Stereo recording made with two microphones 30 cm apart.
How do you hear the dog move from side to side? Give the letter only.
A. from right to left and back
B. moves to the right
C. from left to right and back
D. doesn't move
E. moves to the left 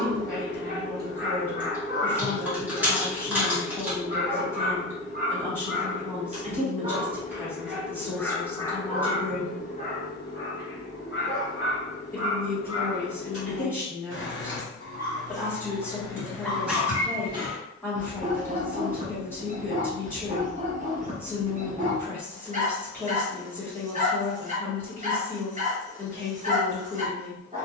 A.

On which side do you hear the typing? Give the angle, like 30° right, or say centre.
10° right.